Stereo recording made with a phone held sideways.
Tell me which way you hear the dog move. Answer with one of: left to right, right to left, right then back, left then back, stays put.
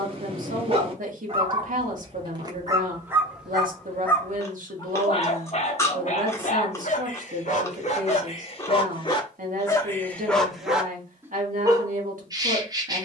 left then back.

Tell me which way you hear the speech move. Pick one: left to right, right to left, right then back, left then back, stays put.
stays put.